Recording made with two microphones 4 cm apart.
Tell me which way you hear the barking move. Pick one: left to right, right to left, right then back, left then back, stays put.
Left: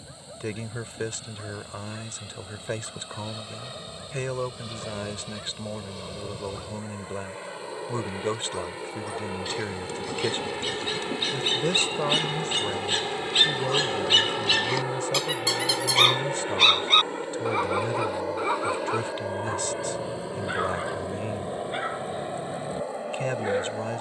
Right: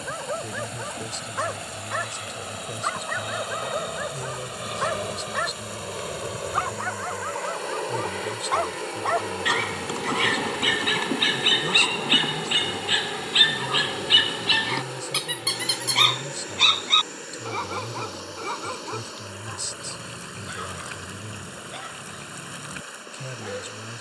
right to left.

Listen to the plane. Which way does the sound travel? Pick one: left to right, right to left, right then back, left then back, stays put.
right to left.